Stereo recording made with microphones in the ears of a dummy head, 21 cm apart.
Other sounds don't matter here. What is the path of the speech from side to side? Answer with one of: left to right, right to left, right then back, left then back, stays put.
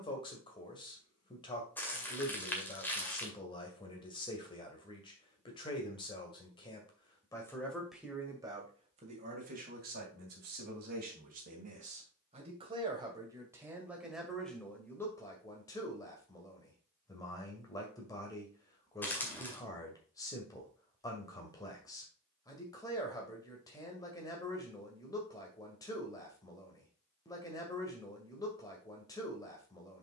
right then back.